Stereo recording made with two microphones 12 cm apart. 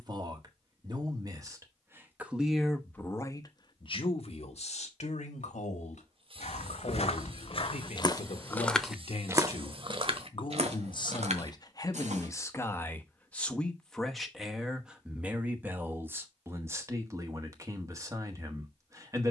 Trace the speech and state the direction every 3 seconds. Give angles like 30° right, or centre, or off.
20° right, 60° left, 70° left, 40° left, 10° left, 20° right, 30° right.